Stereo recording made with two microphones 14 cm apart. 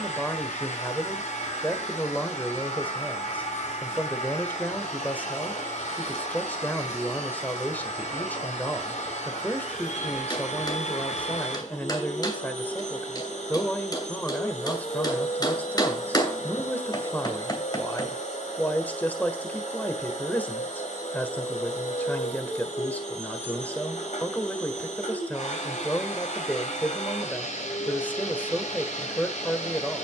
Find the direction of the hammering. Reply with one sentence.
In this clip you hear the hammering on the left.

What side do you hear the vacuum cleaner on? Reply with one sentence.
You can hear the vacuum cleaner on the left.